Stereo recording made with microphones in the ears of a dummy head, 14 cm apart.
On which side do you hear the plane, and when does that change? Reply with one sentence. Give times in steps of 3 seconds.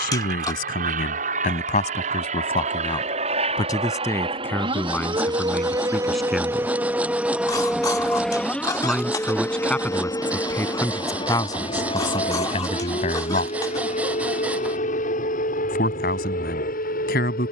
In this clip you hear the plane on the right from 0 s, in the centre from 6 s and on the left from 9 s.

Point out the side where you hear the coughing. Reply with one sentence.
You can hear the coughing on the left.